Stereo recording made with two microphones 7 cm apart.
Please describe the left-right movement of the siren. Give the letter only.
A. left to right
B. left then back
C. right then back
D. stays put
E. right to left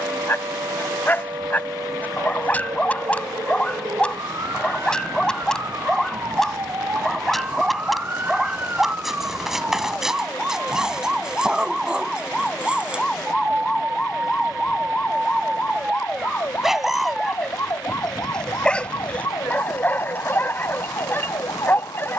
E.